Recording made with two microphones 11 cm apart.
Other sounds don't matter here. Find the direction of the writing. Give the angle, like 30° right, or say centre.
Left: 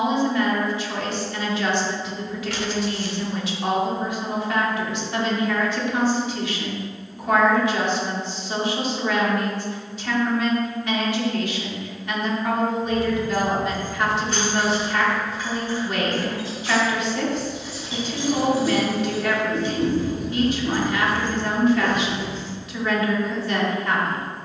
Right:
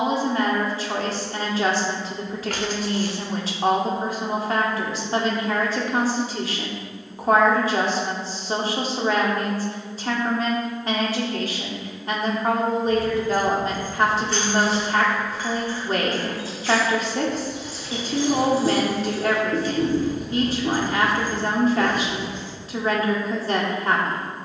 50° right.